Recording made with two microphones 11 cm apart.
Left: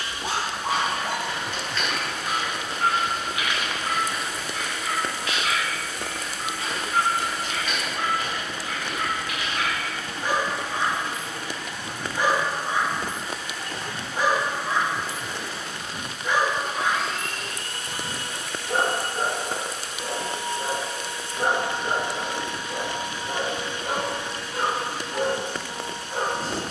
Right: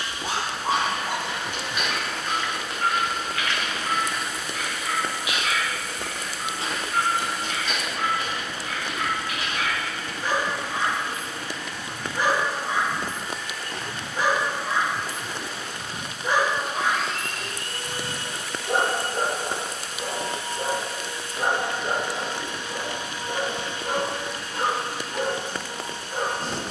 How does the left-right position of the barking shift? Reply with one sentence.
In this clip you hear the barking go right and come back.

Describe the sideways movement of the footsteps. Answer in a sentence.
In this clip you hear the footsteps move from right to left and back again.